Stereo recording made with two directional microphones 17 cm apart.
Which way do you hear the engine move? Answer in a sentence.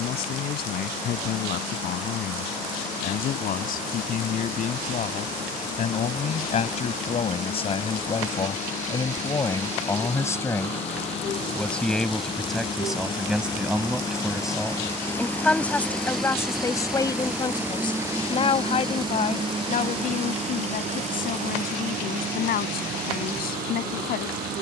In this clip you hear the engine travel towards the right.